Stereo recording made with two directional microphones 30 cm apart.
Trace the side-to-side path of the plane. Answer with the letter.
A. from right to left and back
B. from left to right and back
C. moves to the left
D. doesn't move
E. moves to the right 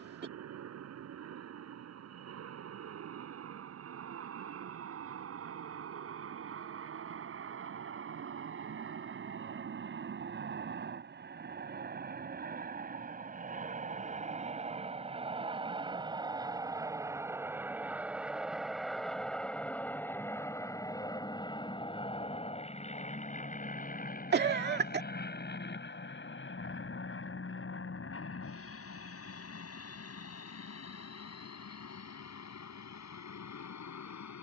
C.